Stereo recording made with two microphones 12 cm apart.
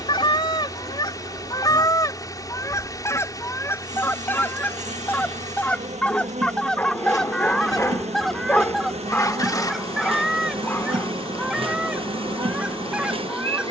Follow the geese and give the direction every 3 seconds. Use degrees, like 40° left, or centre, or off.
30° left, 20° left, centre, centre, 10° right.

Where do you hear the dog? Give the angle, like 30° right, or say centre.
10° left.